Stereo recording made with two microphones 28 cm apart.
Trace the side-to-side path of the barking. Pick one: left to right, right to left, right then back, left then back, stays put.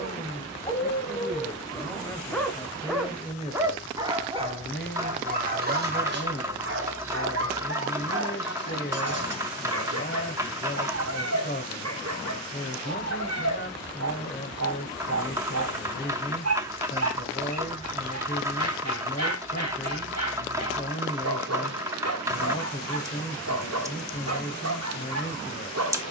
left to right.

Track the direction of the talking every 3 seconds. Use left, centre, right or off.
centre, left, left, left, left, left, left, left, left.